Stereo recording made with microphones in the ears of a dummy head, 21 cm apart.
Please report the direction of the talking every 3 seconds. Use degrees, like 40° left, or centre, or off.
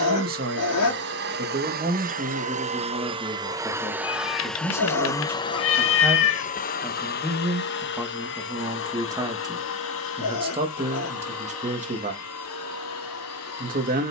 30° right, centre, 10° right, 20° right, 40° right.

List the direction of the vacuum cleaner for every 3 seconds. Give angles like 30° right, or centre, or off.
40° right, centre, 40° left, 60° left, 70° left.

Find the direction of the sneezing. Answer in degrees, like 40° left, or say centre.
80° left.